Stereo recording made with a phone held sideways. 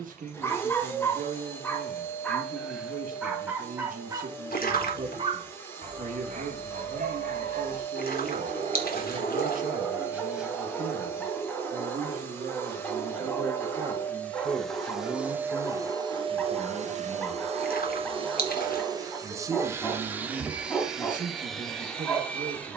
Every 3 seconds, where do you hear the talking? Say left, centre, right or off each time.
right, right, right, right, right, left, right, right.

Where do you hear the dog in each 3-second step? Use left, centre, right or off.
centre, right, right, centre, centre, centre, centre, centre.